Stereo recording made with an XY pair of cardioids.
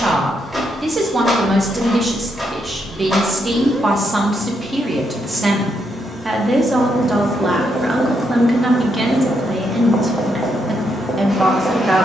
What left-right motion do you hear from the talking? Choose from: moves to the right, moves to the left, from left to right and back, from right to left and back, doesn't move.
doesn't move.